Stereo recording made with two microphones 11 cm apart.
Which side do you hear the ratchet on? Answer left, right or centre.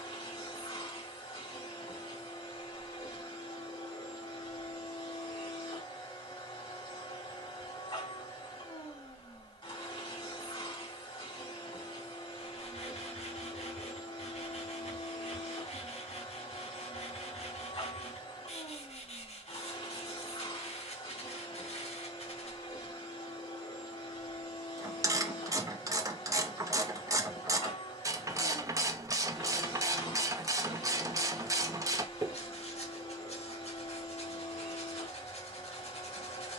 right.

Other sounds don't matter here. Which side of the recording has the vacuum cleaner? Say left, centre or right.
left.